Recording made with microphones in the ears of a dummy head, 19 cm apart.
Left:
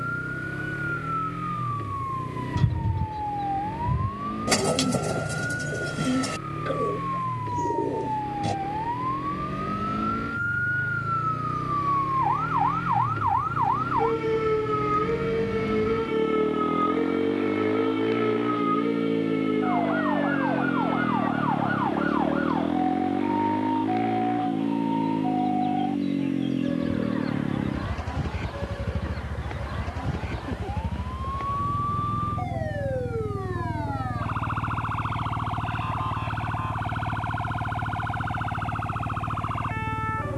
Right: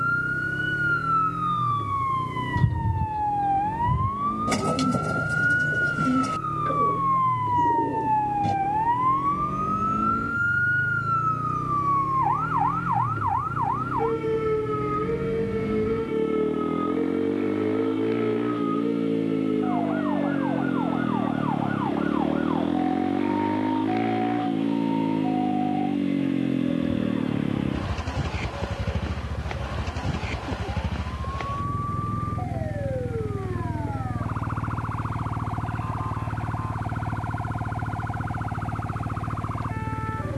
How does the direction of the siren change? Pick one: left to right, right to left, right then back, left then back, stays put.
right to left.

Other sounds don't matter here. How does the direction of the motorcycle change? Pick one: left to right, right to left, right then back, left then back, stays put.
left to right.